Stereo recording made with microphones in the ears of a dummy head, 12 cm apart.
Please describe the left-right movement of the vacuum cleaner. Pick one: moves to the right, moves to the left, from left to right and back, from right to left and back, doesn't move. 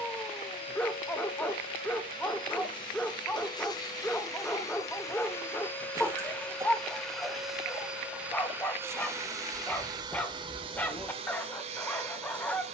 moves to the right.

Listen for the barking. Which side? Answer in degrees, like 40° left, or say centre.
10° left.